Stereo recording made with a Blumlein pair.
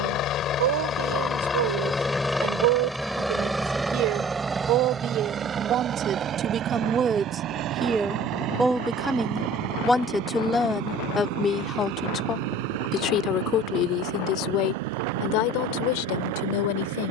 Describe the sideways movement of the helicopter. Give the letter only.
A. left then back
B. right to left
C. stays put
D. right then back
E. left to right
E.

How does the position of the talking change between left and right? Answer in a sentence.
You can hear the talking move to the left.